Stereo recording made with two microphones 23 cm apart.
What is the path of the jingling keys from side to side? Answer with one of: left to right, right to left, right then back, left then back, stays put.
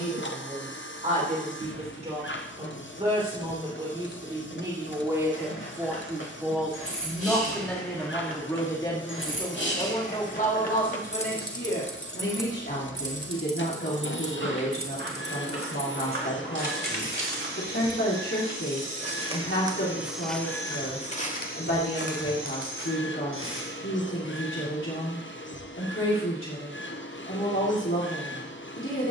left to right.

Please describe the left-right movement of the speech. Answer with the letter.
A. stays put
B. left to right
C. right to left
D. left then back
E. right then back
C.